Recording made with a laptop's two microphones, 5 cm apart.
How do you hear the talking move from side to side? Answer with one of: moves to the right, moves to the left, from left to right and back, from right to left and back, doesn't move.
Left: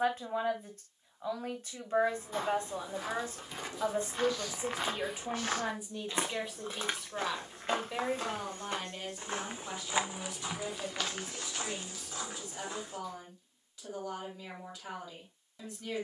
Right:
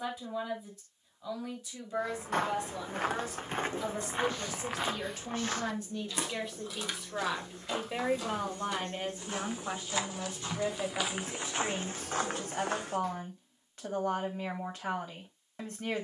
moves to the right.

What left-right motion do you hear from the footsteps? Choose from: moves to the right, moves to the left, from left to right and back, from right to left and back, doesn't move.
from right to left and back.